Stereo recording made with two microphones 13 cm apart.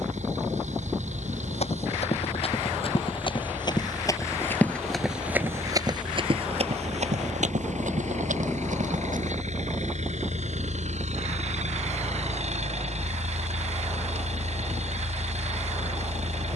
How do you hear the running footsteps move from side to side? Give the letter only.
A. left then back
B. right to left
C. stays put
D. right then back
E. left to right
E.